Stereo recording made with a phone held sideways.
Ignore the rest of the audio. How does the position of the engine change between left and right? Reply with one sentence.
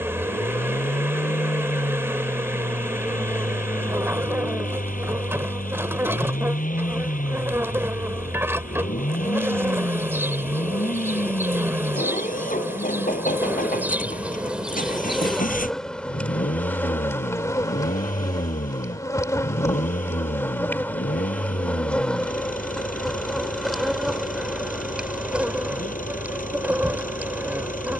You can hear the engine stay in one place.